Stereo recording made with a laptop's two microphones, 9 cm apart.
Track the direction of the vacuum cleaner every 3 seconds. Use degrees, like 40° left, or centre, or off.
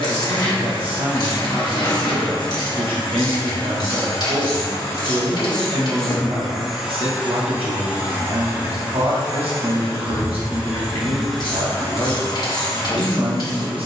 60° left, 40° left, 20° right, 20° right, 50° left.